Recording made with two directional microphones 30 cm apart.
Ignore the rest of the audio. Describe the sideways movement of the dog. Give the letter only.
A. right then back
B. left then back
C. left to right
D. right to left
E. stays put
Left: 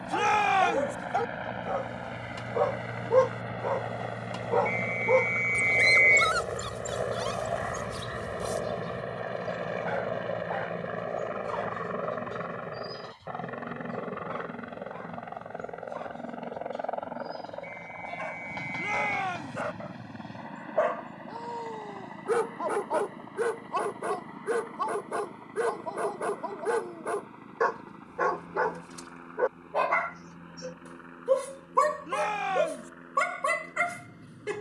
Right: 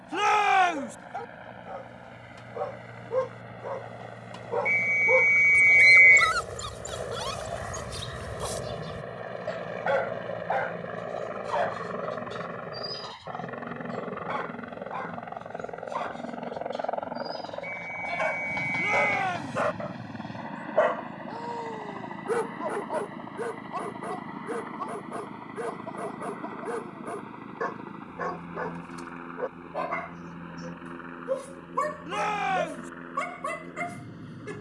A.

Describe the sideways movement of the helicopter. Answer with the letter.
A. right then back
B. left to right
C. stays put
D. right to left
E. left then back
B.